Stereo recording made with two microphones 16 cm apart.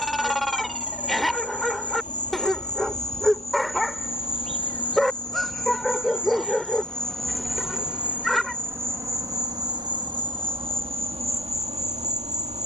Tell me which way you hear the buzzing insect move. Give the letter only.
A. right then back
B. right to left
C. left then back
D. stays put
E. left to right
E.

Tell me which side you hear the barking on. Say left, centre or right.
centre.